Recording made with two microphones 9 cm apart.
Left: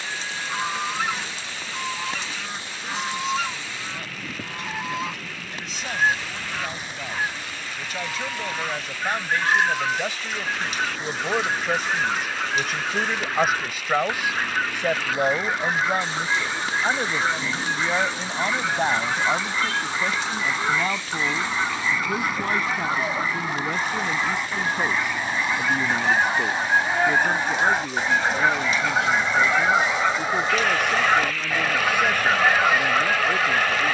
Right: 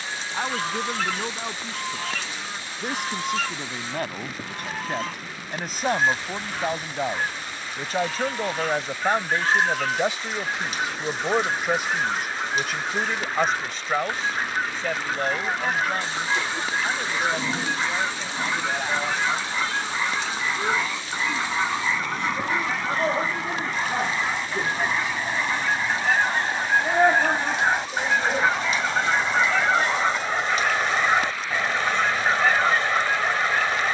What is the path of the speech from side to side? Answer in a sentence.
In this clip you hear the speech move from right to left.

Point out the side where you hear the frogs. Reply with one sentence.
In this clip you hear the frogs on the right.